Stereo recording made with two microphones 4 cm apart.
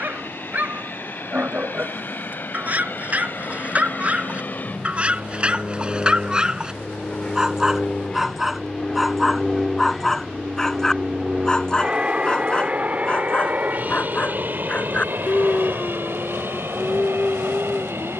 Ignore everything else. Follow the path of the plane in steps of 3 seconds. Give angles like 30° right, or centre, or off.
60° left, 50° left, 30° left, 10° right, 40° right, 50° right.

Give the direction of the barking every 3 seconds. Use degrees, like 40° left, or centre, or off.
40° right, 30° right, 10° right, 10° left, 30° left, 30° left.